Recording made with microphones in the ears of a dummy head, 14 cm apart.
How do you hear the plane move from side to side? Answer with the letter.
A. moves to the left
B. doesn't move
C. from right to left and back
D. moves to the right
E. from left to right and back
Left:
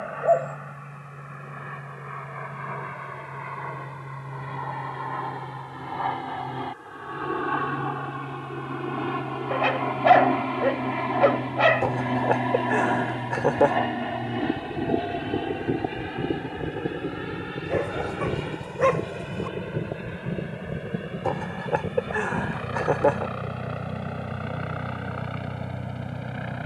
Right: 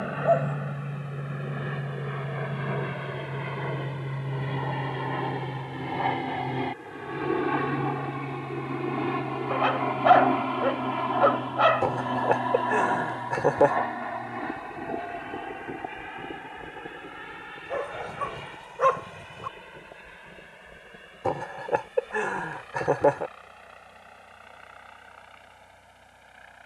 A.